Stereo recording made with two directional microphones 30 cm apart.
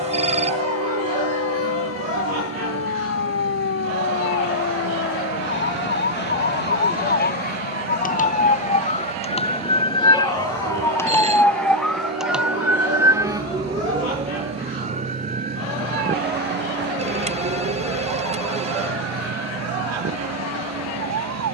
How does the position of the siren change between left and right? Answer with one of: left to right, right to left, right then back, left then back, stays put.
left to right.